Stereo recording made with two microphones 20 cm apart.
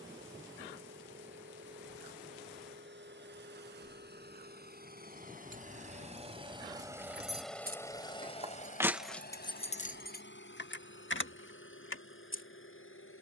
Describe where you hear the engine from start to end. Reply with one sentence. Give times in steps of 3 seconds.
In this clip you hear the engine on the right from 0 s, in the centre from 6 s and on the left from 9 s.